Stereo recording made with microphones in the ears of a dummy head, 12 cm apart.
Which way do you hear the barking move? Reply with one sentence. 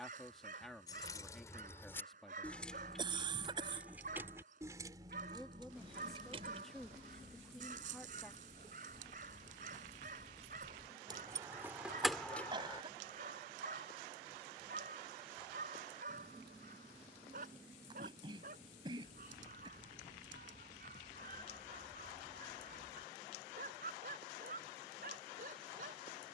You can hear the barking stay put.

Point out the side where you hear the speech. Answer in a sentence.
You can hear the speech in the centre.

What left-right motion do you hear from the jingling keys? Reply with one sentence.
In this clip you hear the jingling keys go right and come back.